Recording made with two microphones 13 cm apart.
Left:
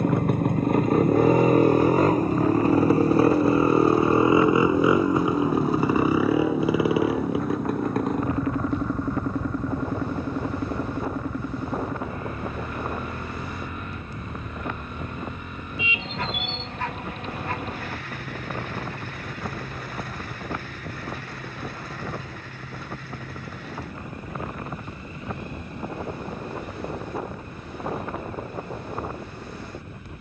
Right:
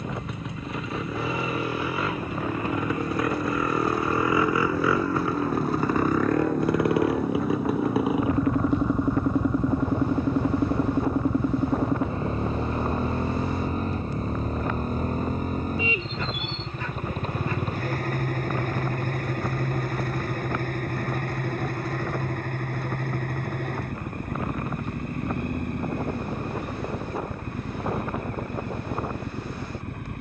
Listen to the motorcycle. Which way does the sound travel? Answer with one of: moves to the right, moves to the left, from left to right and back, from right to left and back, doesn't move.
moves to the right.